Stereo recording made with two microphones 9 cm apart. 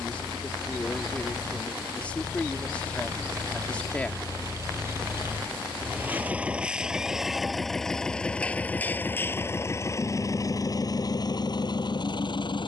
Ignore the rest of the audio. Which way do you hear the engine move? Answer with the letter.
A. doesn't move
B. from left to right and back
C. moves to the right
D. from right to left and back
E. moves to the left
E.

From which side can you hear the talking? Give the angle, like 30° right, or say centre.
10° left.